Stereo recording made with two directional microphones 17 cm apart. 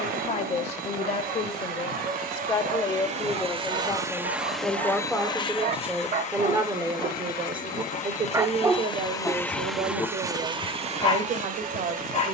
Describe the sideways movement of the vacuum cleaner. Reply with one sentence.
In this clip you hear the vacuum cleaner go left and come back.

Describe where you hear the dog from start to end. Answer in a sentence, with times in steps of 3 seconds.
You can hear the dog on the right from 0 s and on the left from 9 s.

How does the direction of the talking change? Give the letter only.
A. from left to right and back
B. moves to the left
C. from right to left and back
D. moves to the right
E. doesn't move
D.